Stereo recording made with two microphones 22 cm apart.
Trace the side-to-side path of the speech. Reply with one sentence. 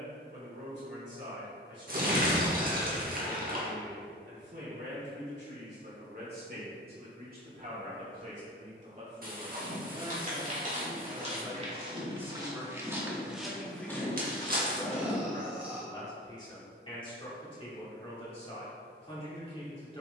In this clip you hear the speech go from the right side to the left.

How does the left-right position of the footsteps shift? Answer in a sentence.
You can hear the footsteps travel towards the left.